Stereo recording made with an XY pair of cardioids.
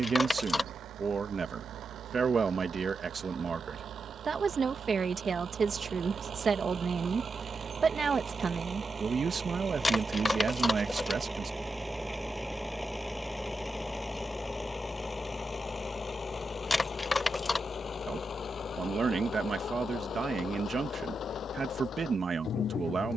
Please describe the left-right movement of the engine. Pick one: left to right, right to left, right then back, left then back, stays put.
right to left.